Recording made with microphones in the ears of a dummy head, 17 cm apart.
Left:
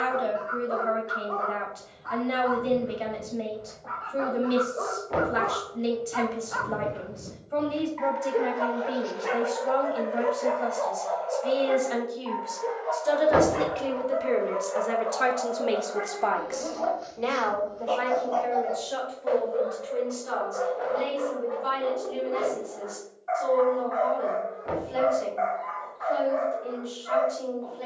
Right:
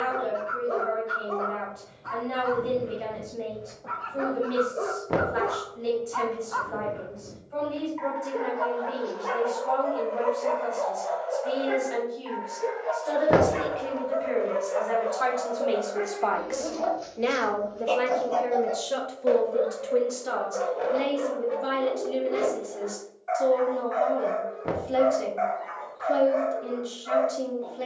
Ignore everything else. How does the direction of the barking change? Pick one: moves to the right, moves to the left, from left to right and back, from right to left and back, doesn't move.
from right to left and back.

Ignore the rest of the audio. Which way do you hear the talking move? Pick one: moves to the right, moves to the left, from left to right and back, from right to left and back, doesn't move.
moves to the right.